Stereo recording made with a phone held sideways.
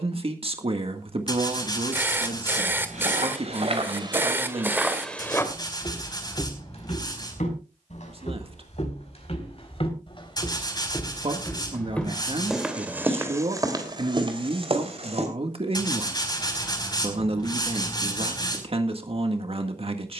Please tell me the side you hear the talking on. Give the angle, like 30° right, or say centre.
40° right.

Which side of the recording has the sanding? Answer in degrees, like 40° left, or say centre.
30° left.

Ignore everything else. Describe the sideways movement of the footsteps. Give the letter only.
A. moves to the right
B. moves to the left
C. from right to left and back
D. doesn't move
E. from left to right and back
C.